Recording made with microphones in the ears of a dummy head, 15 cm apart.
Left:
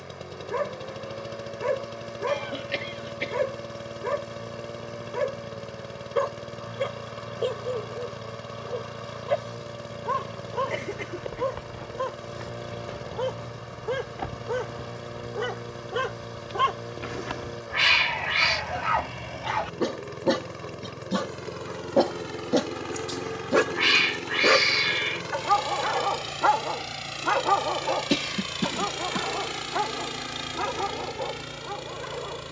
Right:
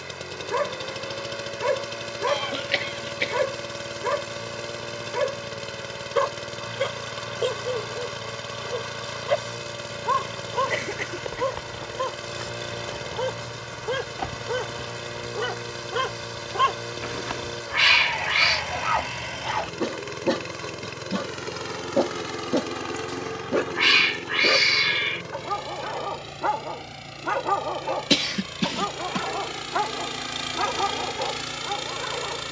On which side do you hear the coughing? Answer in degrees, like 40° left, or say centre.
40° right.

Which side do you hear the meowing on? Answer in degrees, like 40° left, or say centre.
10° right.